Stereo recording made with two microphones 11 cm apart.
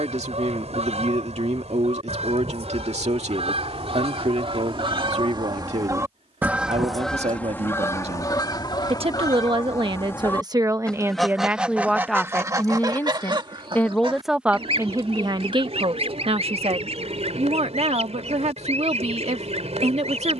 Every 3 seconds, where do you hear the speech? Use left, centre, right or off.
right, right, right, right, centre, right, right.